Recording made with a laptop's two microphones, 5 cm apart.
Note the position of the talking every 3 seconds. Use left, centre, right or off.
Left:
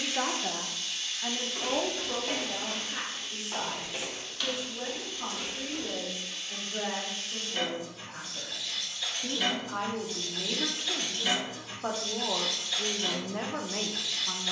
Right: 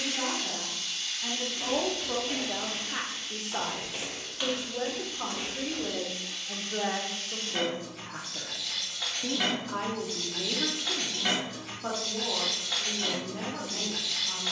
centre, right, right, centre, left.